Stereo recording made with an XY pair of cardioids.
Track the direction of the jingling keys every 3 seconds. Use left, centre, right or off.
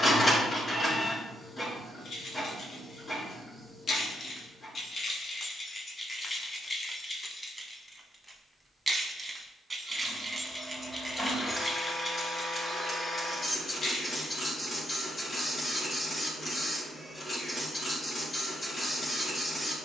left, left, centre, centre, left, off, off.